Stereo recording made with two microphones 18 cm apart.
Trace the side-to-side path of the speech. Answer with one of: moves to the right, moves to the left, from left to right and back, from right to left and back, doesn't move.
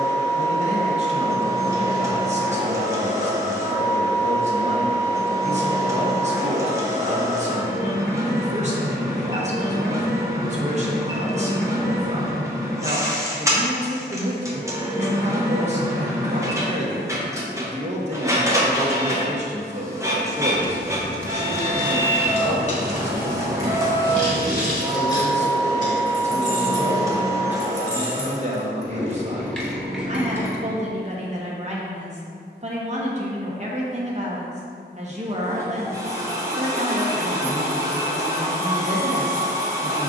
doesn't move.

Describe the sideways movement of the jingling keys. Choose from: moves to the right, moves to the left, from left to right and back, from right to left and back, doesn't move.
from right to left and back.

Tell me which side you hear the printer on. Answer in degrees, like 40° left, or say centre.
20° right.